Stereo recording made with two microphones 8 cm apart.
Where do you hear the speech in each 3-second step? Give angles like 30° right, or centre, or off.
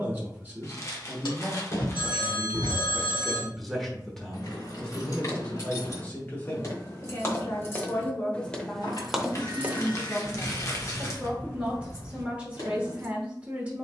20° right, 10° left, 30° left, 10° right, 20° right.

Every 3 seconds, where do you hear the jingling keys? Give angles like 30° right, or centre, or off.
off, 50° left, 30° left, centre, 50° left.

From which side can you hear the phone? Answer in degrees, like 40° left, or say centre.
80° left.